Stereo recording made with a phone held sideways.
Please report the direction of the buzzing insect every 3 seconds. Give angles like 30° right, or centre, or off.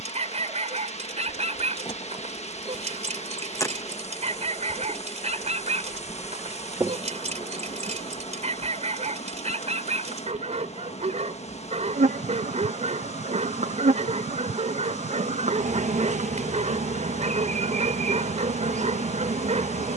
30° left, 10° left, 30° right, 60° right, 60° right, 60° right, 60° right.